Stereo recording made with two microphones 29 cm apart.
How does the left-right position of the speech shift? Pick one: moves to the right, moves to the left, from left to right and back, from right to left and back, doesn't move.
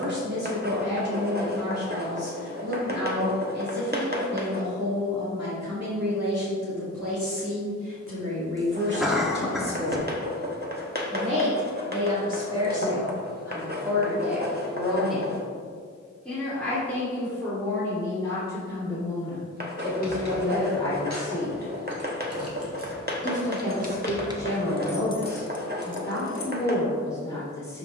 moves to the left.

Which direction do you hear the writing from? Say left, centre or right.
right.